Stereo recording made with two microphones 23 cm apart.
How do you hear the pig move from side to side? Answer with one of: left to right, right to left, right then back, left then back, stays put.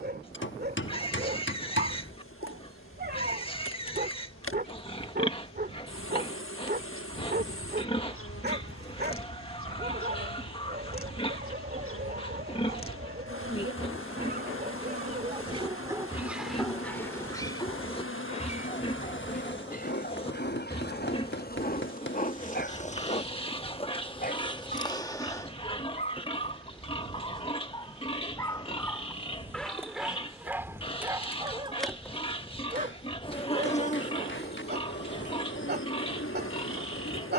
stays put.